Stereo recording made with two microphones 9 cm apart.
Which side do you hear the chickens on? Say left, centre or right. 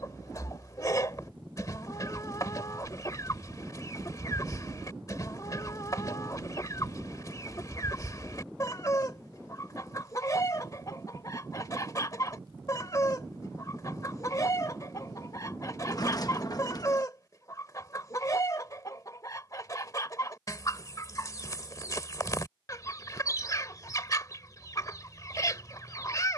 left.